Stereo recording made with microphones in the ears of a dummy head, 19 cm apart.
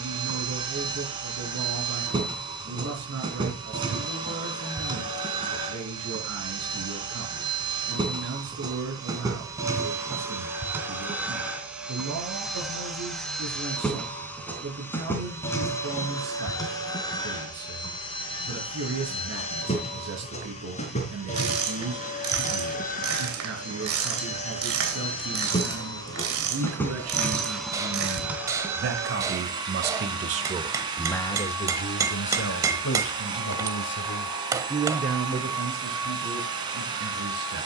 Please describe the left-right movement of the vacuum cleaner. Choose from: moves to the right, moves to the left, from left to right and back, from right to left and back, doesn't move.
from right to left and back.